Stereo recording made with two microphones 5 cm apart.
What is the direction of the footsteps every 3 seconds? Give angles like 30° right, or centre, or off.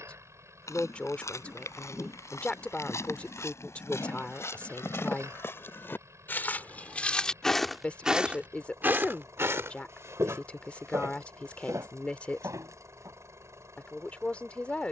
70° left, 60° left, 10° left, 60° right, 80° right.